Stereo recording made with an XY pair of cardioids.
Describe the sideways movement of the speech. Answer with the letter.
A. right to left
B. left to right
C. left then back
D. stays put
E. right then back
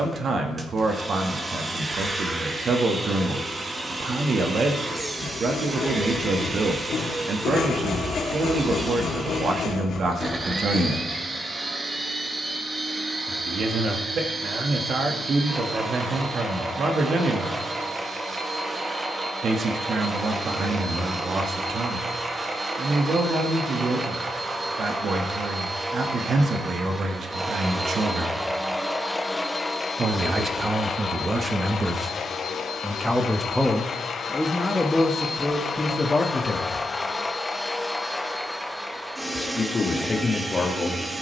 A.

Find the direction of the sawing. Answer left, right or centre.
left.